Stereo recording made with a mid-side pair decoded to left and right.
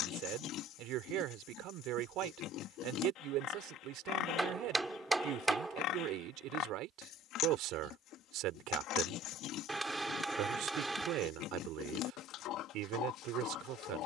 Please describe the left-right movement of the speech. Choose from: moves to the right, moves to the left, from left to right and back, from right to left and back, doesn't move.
doesn't move.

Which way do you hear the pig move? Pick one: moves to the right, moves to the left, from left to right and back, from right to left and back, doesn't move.
doesn't move.